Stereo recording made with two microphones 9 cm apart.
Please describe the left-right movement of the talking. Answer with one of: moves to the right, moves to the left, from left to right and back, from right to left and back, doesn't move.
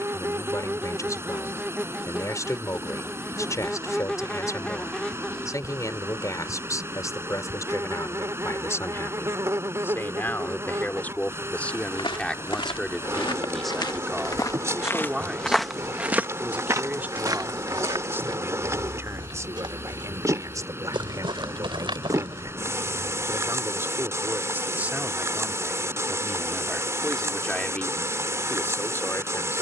from left to right and back.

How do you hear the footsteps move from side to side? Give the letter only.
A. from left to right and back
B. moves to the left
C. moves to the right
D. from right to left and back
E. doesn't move
C.